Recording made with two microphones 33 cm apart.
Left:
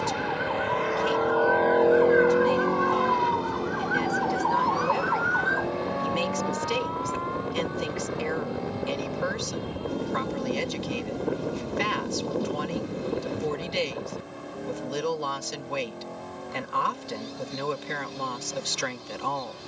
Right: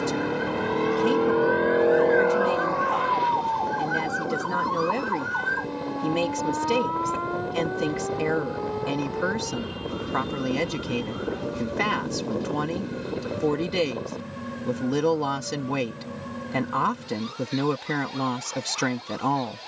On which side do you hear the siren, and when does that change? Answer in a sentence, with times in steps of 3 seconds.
In this clip you hear the siren on the left from 0 s, in the centre from 3 s and on the right from 6 s.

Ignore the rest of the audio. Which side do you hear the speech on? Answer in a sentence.
In this clip you hear the speech on the right.